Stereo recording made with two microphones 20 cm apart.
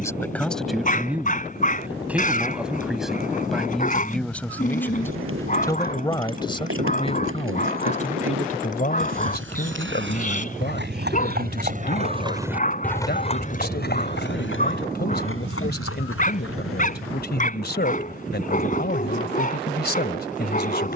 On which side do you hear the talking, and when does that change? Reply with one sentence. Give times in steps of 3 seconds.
You can hear the talking in the centre from 0 s and on the left from 6 s.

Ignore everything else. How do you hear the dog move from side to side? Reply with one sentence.
You can hear the dog stay in one place.